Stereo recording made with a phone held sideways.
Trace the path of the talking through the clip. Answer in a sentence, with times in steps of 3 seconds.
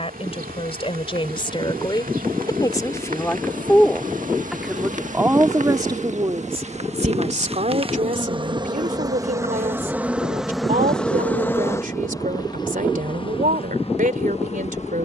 In this clip you hear the talking on the left from 0 s, in the centre from 3 s and on the right from 6 s.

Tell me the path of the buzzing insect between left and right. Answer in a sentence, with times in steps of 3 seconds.
You can hear the buzzing insect on the right from 0 s, in the centre from 9 s and on the left from 12 s.